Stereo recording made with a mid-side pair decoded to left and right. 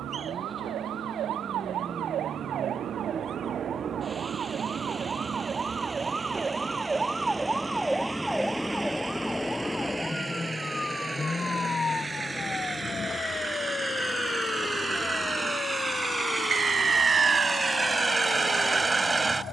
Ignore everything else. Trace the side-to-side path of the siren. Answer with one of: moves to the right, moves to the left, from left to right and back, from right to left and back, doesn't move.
moves to the left.